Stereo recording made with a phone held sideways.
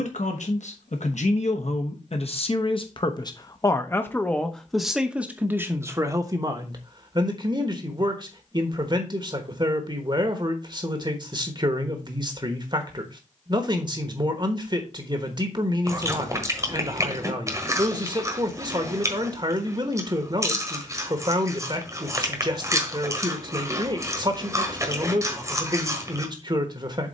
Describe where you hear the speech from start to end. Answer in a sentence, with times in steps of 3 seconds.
You can hear the speech on the left from 0 s, in the centre from 3 s and on the right from 6 s.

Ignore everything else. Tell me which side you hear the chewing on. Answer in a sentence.
You can hear the chewing on the right.